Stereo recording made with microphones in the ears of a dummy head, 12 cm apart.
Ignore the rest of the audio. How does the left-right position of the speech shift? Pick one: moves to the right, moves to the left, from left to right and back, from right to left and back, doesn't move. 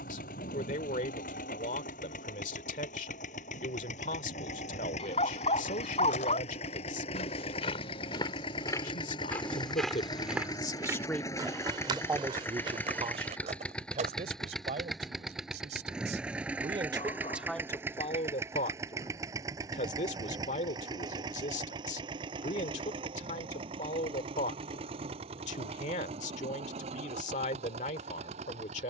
from left to right and back.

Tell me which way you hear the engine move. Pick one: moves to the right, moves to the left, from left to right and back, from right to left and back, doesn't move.
moves to the right.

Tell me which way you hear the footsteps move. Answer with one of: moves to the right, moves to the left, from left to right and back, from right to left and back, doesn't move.
moves to the right.